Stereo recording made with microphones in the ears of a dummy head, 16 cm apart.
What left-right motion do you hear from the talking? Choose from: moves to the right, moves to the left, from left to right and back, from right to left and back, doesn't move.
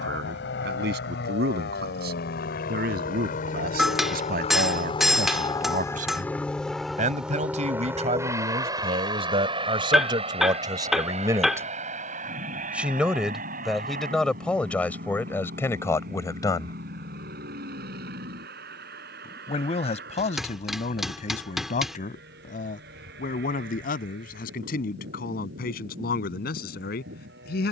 moves to the left.